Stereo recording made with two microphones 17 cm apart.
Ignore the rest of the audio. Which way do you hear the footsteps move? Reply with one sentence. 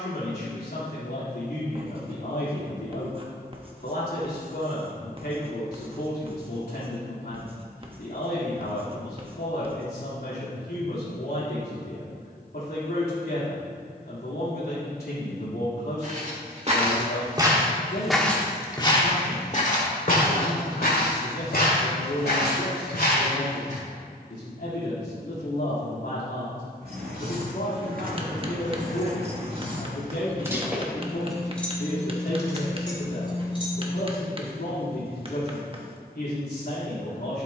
You can hear the footsteps go from the right side to the left.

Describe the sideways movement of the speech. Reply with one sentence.
You can hear the speech stay put.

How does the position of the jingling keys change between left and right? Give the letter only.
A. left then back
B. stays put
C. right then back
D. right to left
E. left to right
D.